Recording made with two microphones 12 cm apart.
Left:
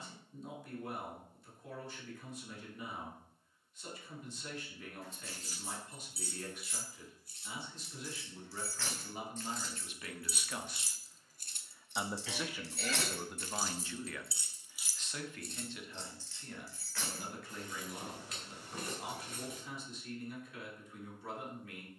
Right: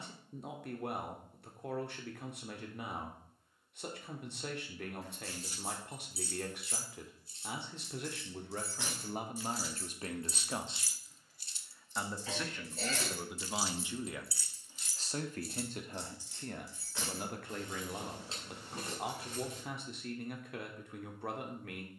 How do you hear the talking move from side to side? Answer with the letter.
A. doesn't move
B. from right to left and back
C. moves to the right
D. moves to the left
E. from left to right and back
B.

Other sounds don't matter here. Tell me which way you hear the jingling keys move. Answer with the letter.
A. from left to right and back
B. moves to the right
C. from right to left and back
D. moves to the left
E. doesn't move
C.